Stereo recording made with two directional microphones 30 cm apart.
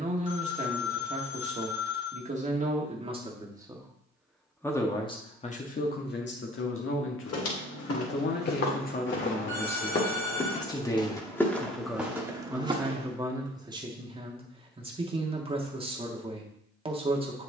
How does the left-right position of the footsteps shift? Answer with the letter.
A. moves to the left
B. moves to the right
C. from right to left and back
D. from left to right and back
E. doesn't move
B.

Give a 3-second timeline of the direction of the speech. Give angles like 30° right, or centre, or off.
20° right, 10° left, 40° left, 20° left, 10° right, 20° right.